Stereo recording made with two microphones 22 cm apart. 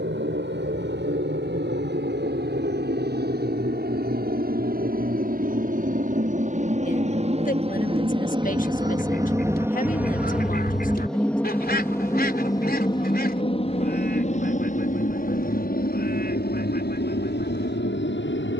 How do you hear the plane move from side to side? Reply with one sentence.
You can hear the plane move from right to left.